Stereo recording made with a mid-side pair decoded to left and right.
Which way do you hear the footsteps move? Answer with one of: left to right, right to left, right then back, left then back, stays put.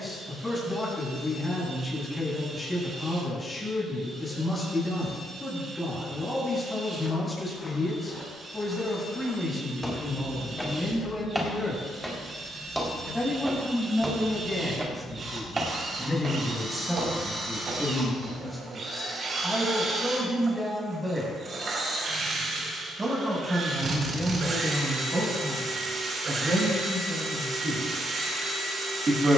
left to right.